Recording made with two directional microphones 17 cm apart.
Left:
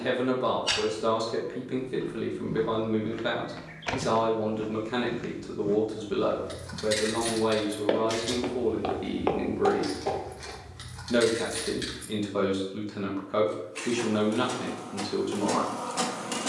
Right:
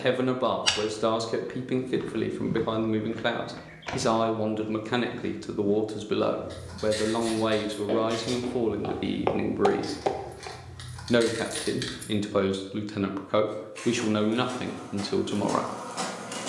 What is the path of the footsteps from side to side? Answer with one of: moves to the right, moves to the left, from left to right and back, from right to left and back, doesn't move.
from right to left and back.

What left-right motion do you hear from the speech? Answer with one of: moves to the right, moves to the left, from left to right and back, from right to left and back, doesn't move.
doesn't move.